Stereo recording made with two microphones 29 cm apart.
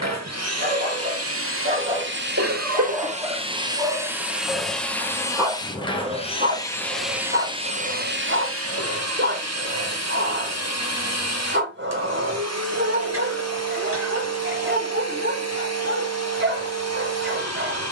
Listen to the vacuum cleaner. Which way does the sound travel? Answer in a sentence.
You can hear the vacuum cleaner go left and come back.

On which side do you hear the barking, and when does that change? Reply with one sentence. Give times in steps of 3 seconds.
In this clip you hear the barking on the right from 0 s, in the centre from 3 s and on the right from 6 s.